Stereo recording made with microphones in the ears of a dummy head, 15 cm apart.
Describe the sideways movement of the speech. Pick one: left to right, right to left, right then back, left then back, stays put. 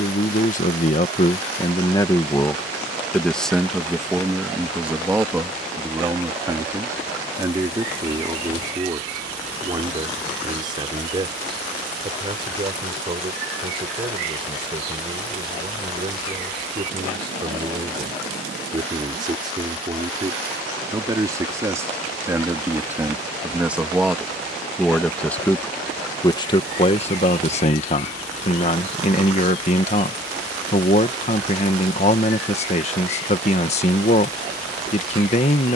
right then back.